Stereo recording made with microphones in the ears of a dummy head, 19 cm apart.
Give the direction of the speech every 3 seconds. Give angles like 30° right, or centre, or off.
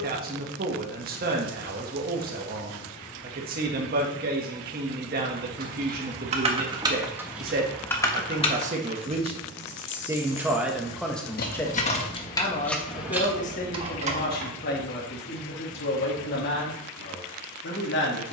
40° right, 40° right, 40° right, centre, 40° left, 50° left.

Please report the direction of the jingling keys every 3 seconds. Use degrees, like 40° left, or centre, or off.
off, 40° right, centre, 50° left, 10° right, off.